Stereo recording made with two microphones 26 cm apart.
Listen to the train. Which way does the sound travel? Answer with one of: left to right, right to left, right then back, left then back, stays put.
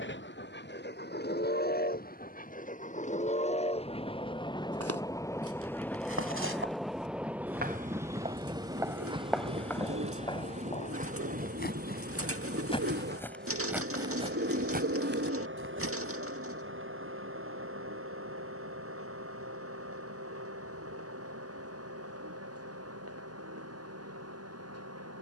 left to right.